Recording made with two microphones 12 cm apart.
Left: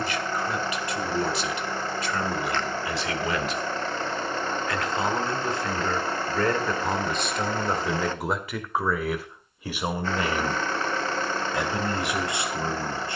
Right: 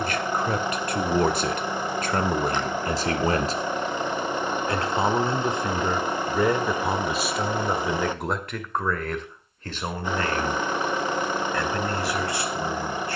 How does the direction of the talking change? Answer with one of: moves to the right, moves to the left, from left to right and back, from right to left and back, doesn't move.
moves to the left.